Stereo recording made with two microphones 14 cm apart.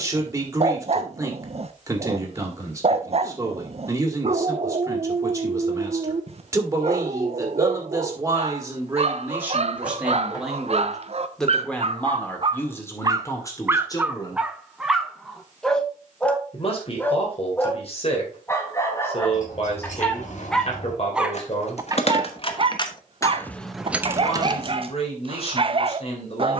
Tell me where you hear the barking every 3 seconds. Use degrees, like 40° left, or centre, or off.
50° right, 50° right, 50° right, 50° right, 20° right, 10° left, 20° left, 30° right, 40° right.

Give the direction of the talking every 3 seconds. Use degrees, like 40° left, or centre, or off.
20° right, 20° right, 20° right, centre, 20° left, 50° left, 50° left, 50° left, 50° left.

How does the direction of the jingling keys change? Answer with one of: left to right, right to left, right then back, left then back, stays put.
left to right.